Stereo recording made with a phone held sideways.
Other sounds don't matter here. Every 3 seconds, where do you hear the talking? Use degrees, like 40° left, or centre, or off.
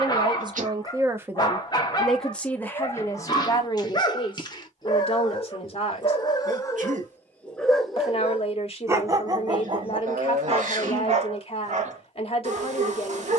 10° right, 40° left, 40° left, 40° left, 40° left.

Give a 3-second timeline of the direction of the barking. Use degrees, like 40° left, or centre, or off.
30° left, 30° left, 10° left, 40° right, 60° right.